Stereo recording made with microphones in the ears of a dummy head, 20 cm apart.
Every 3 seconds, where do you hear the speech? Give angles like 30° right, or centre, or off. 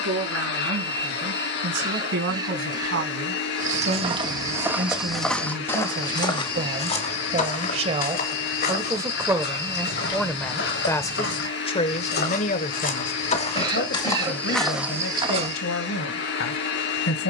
60° right, 50° right, 30° right, 10° left, 50° left, 70° left.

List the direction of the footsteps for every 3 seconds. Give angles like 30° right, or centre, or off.
off, 10° right, 30° left, 50° left, 20° left, 20° right.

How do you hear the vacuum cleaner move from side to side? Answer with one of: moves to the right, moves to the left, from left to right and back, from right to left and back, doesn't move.
doesn't move.